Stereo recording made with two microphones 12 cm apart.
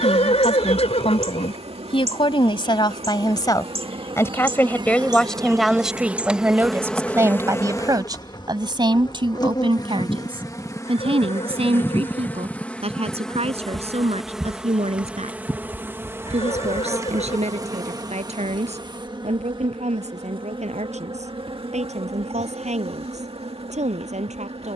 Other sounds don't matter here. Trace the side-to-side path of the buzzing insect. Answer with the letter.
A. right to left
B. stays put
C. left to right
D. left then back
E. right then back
D.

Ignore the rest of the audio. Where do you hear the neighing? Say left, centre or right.
left.